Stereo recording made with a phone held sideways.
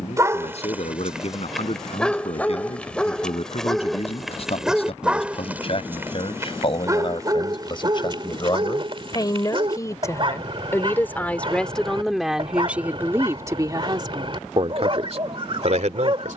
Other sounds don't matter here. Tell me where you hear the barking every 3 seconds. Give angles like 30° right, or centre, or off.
centre, centre, 30° right, 40° right, 40° right, 40° right.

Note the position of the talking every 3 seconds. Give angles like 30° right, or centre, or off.
50° left, 50° left, 40° left, 20° left, 20° right, 60° right.